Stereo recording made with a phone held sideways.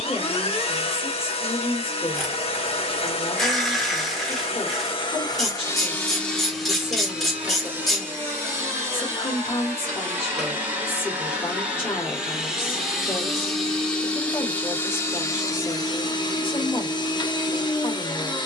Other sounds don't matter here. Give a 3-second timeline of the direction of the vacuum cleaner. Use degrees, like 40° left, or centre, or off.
40° left, 40° left, 10° right, 10° right, centre, 30° left.